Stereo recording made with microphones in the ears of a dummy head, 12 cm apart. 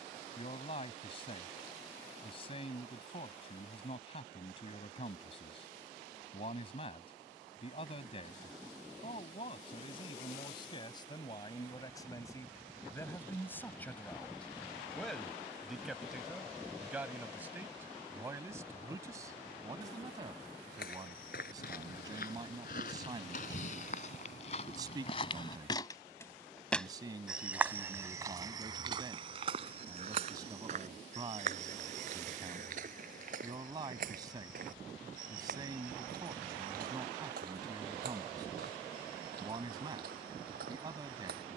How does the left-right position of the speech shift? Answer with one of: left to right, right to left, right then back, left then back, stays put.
left to right.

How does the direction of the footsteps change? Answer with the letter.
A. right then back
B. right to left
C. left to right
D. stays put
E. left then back
C.